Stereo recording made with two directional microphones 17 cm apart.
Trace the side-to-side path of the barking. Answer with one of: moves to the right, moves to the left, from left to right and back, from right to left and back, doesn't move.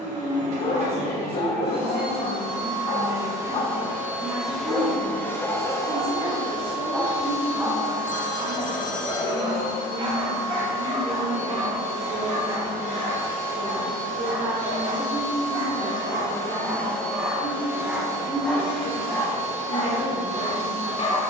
from left to right and back.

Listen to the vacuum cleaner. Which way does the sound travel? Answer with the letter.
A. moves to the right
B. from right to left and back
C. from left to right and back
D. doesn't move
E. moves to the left
B.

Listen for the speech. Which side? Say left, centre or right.
right.